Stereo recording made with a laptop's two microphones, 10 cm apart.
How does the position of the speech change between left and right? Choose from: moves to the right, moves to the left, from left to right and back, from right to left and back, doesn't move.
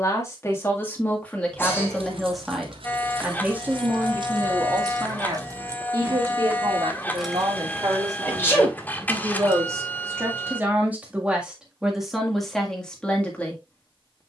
from left to right and back.